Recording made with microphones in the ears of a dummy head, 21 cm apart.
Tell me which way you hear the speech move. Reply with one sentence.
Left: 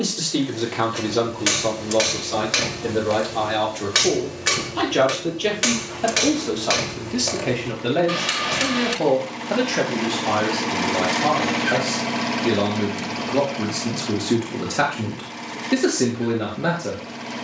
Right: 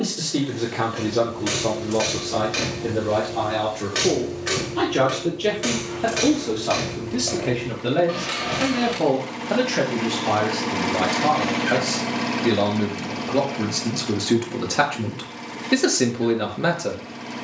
You can hear the speech move from left to right.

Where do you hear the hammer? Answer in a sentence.
In this clip you hear the hammer on the left.